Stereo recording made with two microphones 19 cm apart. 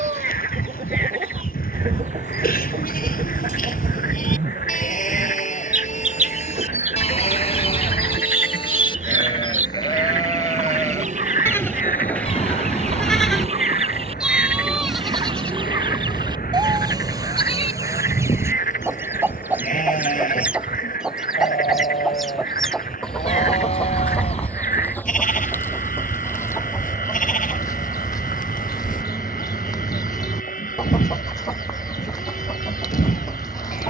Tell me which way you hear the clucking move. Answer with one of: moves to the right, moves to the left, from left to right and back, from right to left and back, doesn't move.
moves to the left.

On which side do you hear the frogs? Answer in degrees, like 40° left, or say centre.
40° left.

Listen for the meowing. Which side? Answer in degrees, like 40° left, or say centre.
30° left.